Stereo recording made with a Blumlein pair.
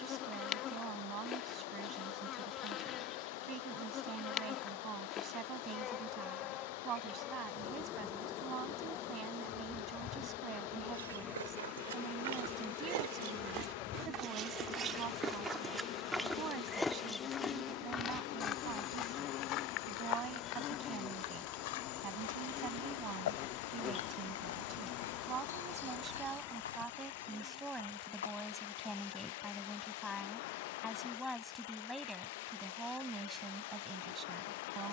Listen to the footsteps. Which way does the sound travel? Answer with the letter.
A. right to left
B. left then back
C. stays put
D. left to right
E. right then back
A.